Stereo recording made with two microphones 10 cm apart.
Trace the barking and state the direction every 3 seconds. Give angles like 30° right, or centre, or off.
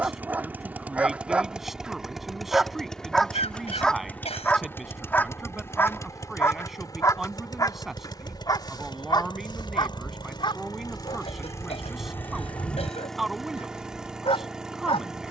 10° right, 10° left, 30° left, 50° left, 60° left.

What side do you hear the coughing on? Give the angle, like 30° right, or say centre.
80° left.